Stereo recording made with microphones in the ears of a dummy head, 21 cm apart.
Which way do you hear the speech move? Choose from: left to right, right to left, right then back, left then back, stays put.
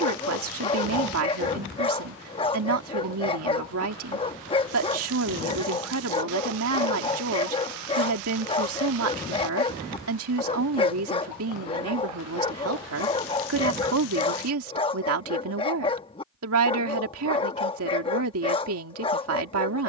stays put.